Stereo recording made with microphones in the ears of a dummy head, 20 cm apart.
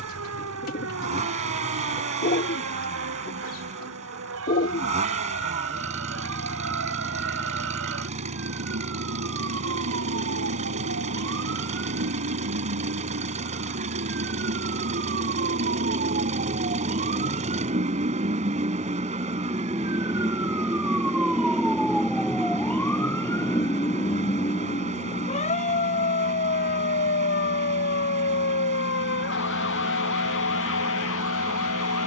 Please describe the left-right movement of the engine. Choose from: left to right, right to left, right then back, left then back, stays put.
stays put.